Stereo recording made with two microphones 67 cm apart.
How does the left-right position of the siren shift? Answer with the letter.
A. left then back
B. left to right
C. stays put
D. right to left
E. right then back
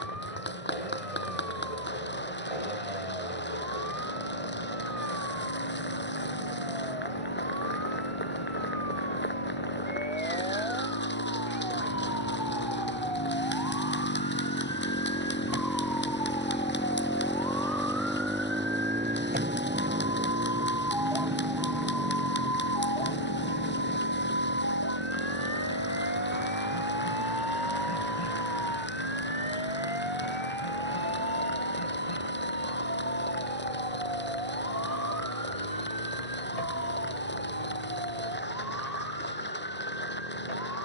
D.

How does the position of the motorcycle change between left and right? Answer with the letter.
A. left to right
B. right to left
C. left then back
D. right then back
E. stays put
A.